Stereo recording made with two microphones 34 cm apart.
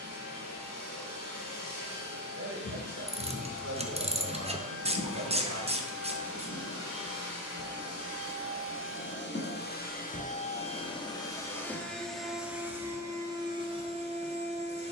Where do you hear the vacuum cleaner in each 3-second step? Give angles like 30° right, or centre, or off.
70° left, 60° left, 50° left, 20° left, 10° right.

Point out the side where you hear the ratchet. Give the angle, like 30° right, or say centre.
20° right.